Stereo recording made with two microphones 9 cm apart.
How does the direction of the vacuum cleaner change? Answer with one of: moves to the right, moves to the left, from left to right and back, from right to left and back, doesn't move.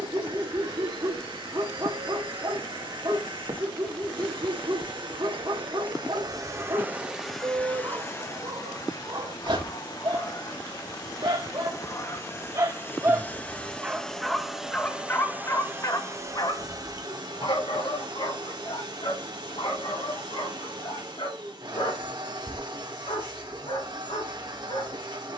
from right to left and back.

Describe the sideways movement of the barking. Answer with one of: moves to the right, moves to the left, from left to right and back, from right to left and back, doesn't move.
moves to the left.